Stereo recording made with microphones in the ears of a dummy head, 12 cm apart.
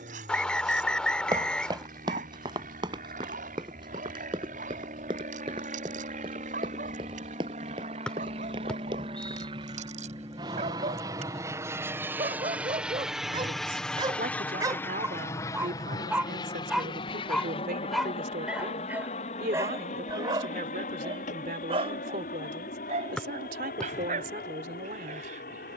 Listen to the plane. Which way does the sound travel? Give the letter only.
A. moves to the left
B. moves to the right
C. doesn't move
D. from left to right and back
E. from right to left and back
A.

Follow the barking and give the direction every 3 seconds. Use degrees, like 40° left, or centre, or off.
70° right, 70° right, 70° right, 60° right, 40° right, centre, 20° right, 50° right, 60° right.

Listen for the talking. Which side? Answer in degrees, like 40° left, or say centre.
70° right.